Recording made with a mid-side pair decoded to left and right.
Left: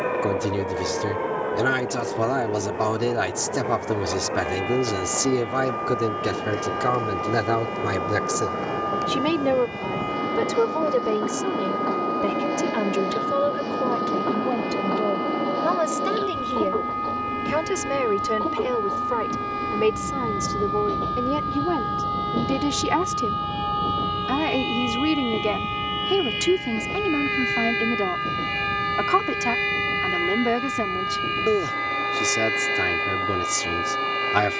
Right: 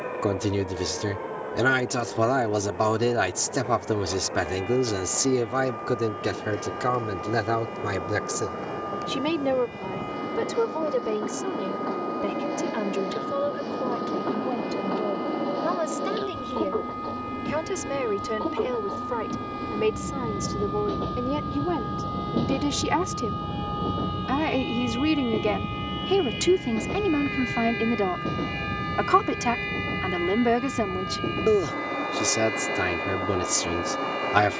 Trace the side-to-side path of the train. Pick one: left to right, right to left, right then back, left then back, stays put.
left to right.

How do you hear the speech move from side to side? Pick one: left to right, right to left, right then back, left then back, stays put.
left then back.